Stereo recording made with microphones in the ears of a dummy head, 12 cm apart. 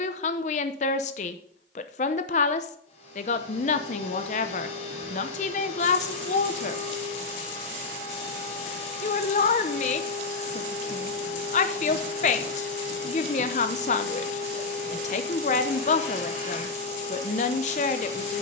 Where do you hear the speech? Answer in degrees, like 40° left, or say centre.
50° left.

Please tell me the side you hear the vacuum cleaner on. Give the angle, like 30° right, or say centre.
50° left.